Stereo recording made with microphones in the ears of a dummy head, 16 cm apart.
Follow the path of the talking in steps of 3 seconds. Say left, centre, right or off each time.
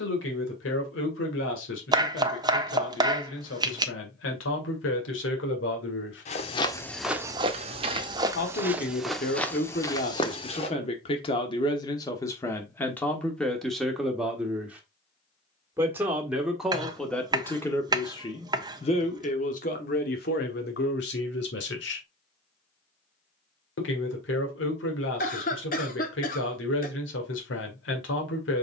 left, left, left, left, centre, centre, left, left, left, left.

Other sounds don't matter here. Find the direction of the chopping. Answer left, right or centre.
right.